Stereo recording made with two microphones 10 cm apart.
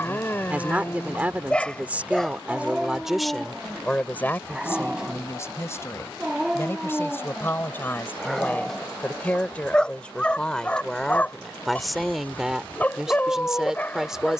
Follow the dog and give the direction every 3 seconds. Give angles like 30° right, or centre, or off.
10° left, 10° right, centre, 10° left, 20° left.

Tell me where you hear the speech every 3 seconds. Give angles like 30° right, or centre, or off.
10° right, 20° left, 20° left, 10° left, centre.